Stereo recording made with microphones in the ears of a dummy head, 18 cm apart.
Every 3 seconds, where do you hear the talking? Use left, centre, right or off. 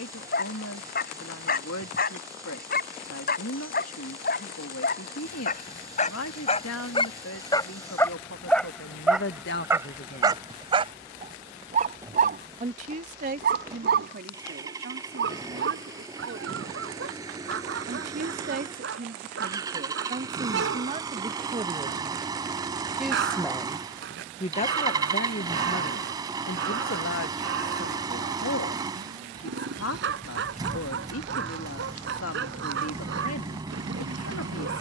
left, left, left, left, right, right, right, centre, left, left, left, left.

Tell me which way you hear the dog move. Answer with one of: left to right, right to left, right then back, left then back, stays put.
left to right.